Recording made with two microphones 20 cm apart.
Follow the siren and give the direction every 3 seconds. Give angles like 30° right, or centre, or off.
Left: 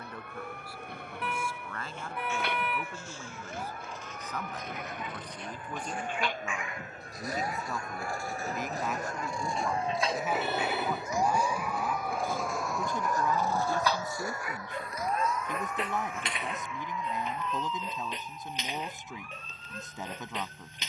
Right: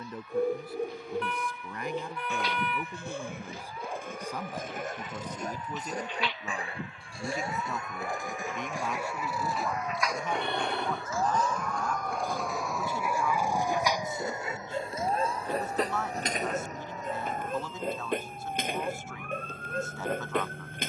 60° left, 60° left, 40° left, 20° left, 10° right, 40° right, 60° right.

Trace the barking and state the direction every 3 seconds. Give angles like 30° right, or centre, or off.
60° right, 50° right, 20° right, centre, 10° right, 40° right, 50° right.